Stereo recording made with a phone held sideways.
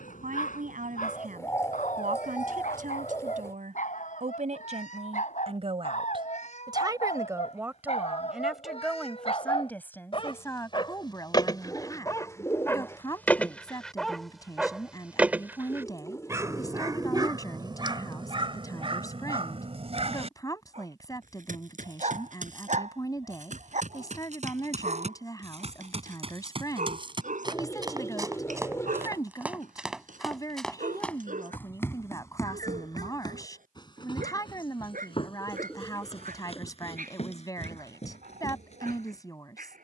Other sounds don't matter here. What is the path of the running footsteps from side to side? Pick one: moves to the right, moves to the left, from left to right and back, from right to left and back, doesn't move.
moves to the left.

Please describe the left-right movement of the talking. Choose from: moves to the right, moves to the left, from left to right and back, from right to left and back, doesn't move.
moves to the left.